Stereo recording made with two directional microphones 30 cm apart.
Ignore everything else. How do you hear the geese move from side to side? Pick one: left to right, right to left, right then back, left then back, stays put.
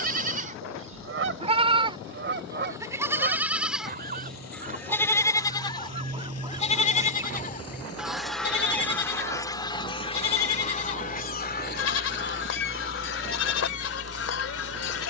right to left.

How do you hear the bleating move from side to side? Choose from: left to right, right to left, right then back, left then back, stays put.
right to left.